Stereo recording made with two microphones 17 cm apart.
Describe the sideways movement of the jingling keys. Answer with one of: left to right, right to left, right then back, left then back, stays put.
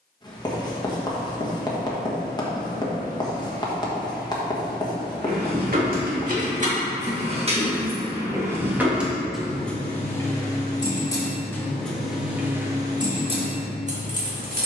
left then back.